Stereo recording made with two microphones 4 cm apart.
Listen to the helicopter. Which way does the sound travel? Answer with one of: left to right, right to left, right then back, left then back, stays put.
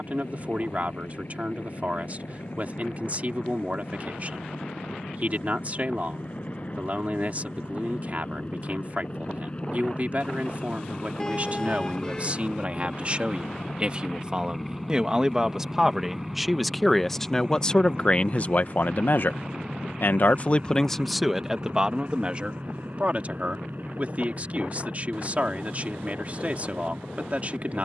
left to right.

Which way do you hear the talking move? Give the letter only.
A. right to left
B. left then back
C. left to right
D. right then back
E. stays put
B.